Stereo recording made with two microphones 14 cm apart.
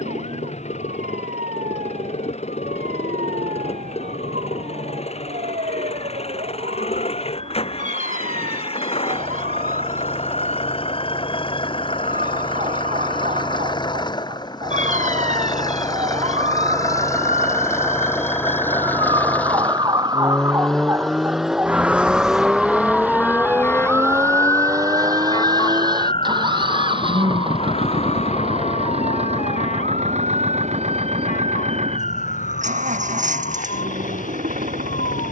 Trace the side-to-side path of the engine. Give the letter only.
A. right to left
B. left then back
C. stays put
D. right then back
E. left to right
E.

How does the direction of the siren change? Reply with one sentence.
You can hear the siren go from the right side to the left.